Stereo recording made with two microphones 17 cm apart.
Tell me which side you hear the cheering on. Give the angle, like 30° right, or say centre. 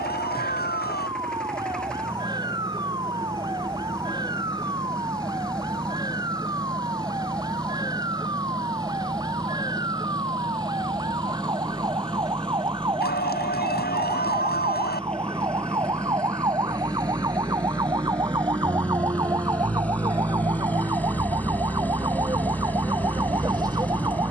70° left.